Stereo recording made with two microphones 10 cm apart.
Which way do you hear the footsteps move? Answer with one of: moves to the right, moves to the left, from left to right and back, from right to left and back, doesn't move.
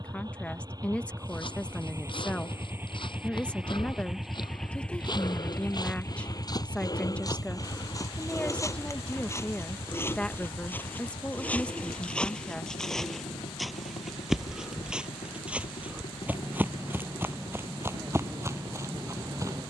moves to the right.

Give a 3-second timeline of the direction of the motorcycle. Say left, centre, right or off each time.
right, centre, left, left, left, left, left.